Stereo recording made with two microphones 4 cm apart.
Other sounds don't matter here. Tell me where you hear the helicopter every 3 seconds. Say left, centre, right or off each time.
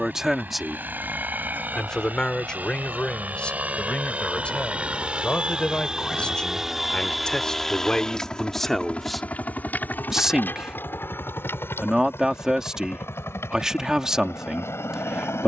right, right, centre, left, left.